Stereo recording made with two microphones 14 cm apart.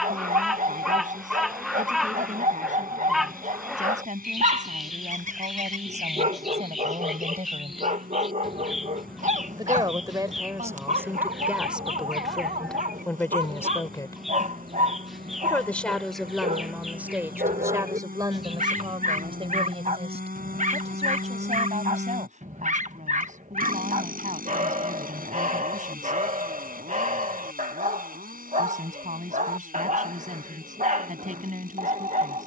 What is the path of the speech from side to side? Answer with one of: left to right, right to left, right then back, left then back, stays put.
left then back.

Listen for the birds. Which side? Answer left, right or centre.
centre.